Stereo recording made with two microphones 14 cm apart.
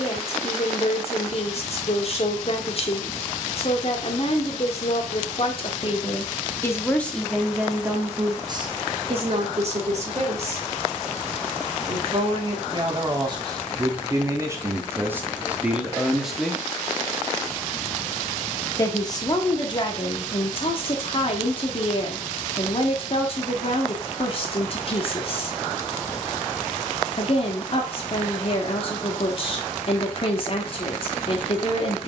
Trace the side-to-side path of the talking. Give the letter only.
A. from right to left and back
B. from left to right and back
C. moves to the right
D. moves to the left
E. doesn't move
B.